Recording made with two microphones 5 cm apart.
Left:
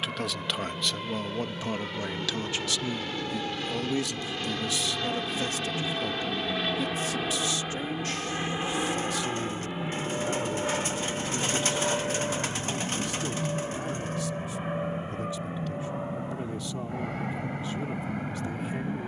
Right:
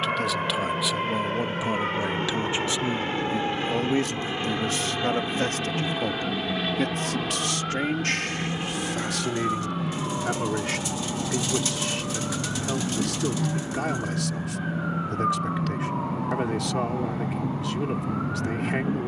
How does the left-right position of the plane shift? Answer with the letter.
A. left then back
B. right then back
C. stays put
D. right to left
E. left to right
D.